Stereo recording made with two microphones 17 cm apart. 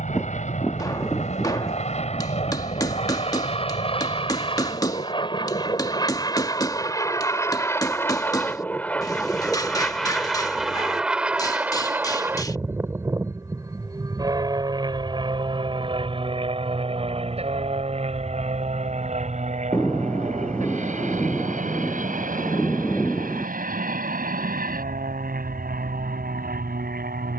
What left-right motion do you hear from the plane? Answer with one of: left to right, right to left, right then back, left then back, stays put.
left to right.